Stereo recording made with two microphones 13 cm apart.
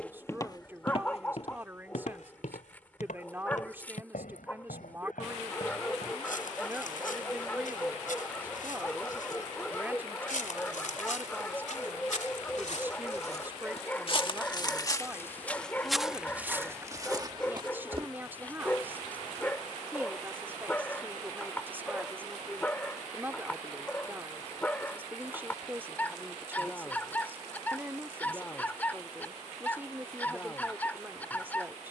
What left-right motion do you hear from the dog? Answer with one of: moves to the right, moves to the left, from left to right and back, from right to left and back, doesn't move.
doesn't move.